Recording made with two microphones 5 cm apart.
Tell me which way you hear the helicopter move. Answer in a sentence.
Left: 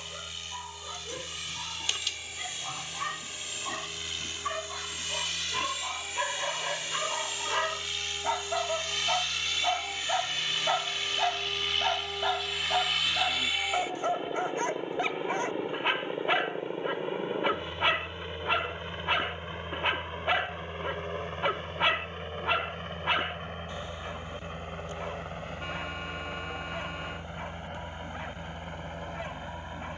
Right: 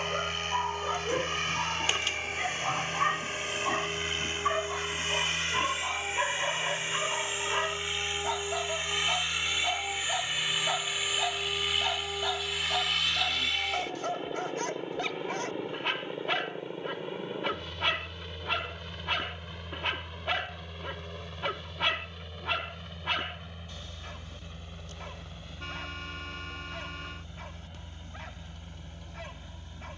In this clip you hear the helicopter move from right to left.